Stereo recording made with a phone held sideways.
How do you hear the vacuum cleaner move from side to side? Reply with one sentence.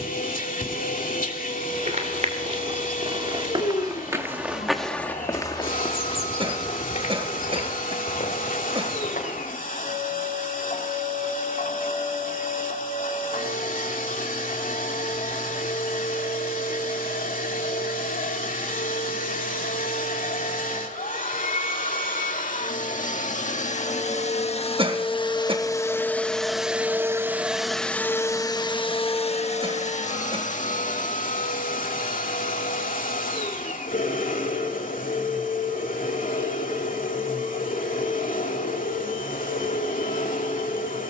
In this clip you hear the vacuum cleaner move from left to right and back again.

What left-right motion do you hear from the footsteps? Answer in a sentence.
In this clip you hear the footsteps move to the left.